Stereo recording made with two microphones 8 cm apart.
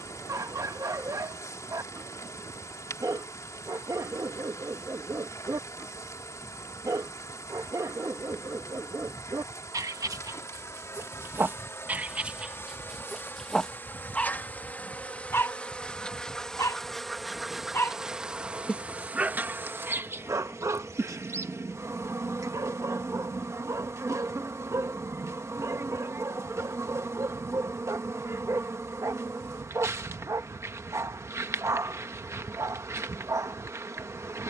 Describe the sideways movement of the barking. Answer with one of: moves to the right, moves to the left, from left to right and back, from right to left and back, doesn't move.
from right to left and back.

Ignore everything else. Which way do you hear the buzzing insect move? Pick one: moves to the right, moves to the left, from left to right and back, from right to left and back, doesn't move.
moves to the right.